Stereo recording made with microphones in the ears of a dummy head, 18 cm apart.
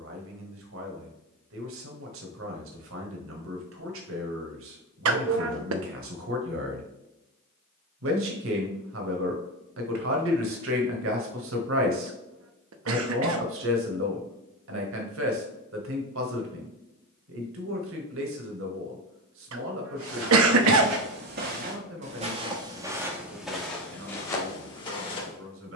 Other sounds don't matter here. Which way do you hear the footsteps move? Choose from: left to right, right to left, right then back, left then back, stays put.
right to left.